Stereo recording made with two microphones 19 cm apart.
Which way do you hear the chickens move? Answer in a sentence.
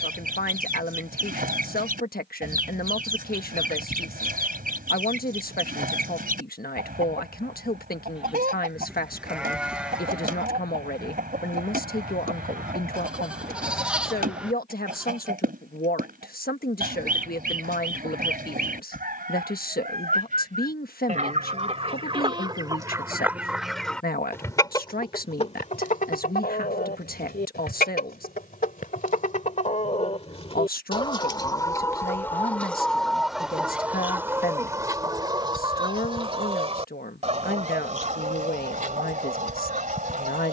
In this clip you hear the chickens go left and come back.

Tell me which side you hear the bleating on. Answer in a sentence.
You can hear the bleating in the centre.